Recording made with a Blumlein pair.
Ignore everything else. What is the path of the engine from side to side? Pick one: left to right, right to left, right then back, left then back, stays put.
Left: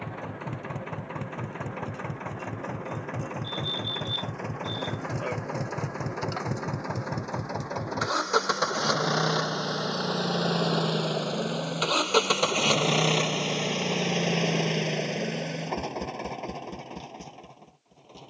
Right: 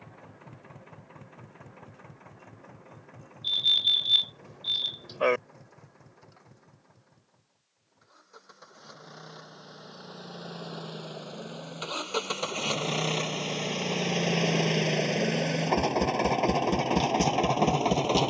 left to right.